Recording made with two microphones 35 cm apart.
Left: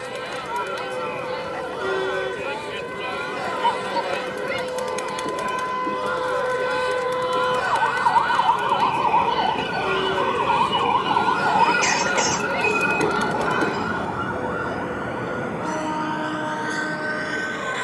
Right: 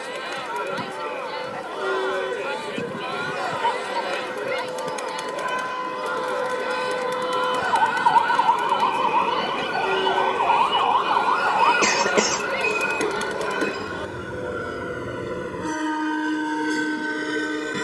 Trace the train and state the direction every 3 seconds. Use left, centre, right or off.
left, left, left, left, centre, right.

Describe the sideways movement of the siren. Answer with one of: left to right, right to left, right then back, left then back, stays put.
right to left.